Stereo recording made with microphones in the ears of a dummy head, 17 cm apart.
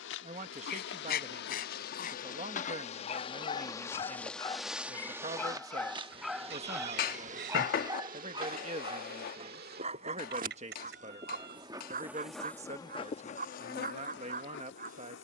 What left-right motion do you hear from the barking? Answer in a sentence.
You can hear the barking move to the right.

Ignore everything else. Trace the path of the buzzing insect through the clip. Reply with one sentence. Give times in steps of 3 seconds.
In this clip you hear the buzzing insect on the left from 0 s, in the centre from 3 s, on the right from 6 s and on the left from 12 s.